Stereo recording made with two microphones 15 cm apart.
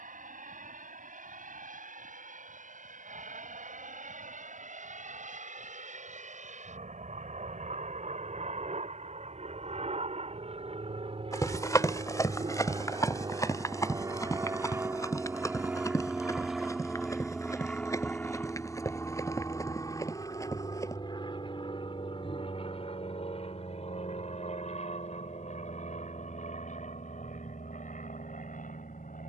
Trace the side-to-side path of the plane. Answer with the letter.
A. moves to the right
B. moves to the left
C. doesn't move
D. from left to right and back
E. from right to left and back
B.